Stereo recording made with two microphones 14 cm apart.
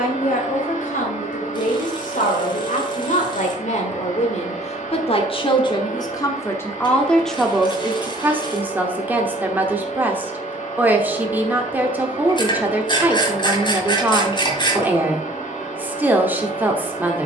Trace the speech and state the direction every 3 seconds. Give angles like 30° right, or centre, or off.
70° left, 50° left, centre, 10° right, 10° right, 10° right.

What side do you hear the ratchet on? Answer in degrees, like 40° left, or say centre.
30° left.